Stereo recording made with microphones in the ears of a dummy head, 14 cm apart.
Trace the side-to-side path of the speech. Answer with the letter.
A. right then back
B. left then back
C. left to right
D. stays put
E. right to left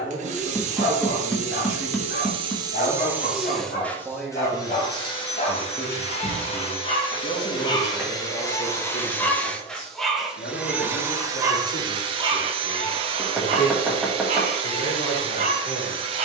E.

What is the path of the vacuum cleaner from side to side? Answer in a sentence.
You can hear the vacuum cleaner go left and come back.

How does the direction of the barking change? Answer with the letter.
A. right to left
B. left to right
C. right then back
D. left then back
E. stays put
B.